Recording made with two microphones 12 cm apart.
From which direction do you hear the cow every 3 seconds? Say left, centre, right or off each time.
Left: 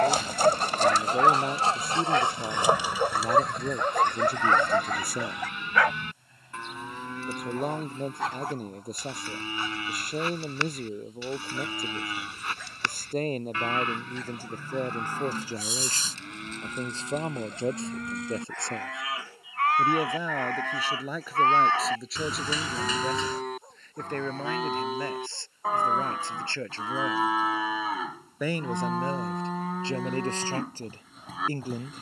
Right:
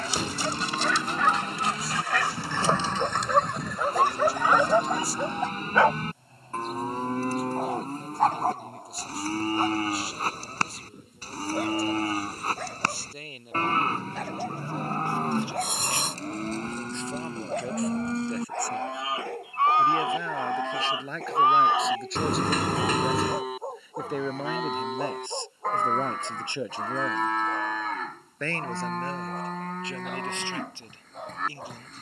right, right, right, right, right, right, right, centre, centre, centre, centre.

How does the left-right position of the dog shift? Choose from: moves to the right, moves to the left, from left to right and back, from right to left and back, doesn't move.
moves to the right.